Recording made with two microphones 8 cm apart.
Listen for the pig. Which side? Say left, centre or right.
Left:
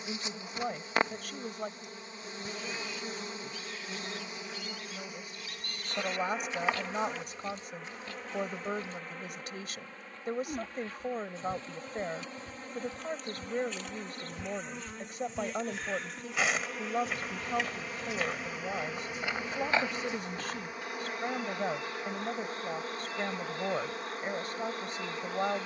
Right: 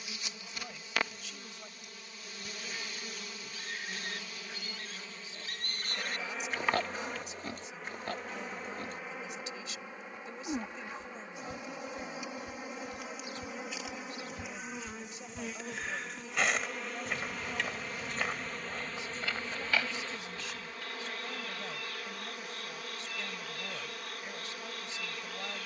right.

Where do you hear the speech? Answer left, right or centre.
left.